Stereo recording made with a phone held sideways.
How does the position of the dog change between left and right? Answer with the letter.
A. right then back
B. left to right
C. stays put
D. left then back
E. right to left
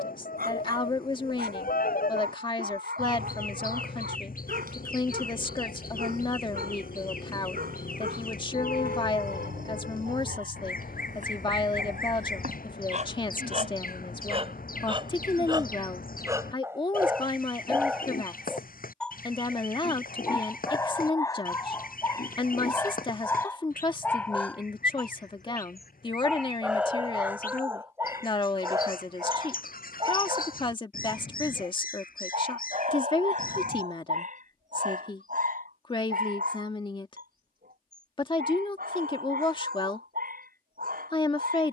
D.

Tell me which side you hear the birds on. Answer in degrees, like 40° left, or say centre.
70° left.